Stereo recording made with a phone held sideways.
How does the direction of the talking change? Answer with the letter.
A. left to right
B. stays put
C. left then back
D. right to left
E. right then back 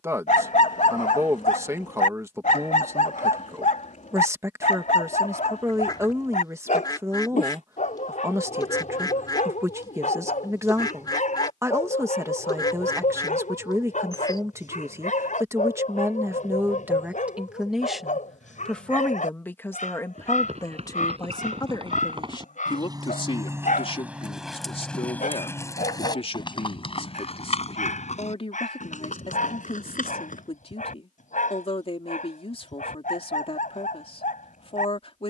D.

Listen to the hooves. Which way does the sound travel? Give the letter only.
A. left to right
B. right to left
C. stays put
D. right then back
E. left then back
B.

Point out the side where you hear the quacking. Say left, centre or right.
left.